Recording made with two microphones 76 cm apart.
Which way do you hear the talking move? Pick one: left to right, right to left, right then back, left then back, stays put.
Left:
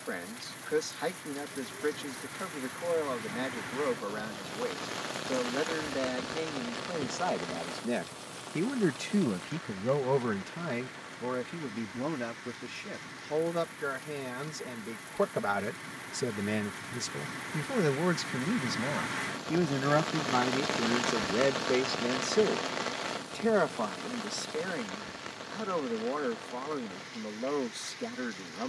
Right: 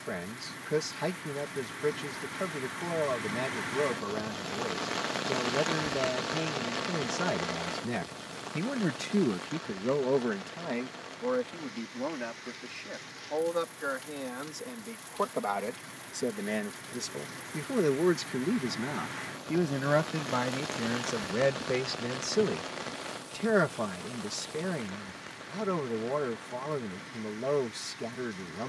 left then back.